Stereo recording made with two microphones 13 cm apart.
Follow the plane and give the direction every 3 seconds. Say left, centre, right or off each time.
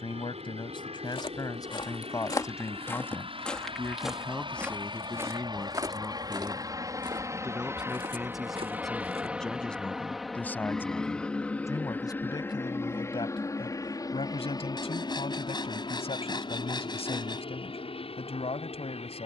right, right, right, centre, left, left, left.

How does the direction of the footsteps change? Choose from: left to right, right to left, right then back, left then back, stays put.
left to right.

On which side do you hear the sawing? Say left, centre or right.
left.